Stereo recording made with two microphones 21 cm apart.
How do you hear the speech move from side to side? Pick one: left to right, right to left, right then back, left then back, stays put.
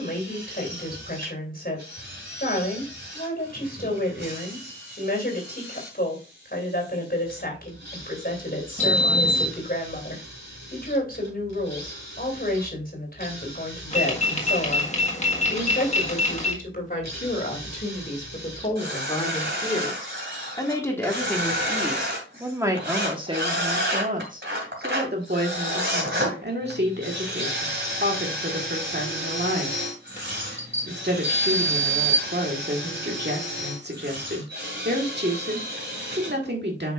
left to right.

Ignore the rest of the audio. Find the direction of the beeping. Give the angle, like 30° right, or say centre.
30° left.